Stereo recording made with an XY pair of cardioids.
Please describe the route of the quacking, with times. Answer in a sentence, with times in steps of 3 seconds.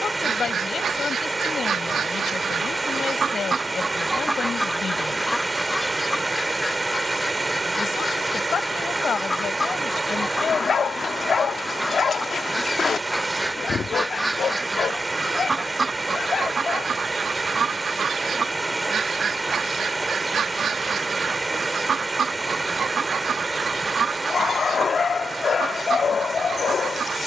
You can hear the quacking on the right from 0 s, in the centre from 3 s, on the left from 6 s, in the centre from 12 s and on the right from 15 s.